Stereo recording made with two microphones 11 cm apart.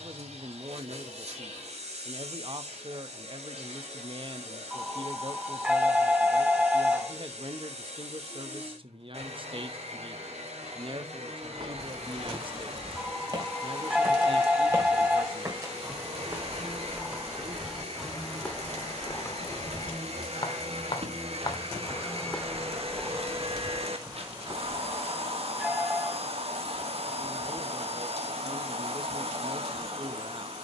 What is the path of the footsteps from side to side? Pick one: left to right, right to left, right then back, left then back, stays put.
left then back.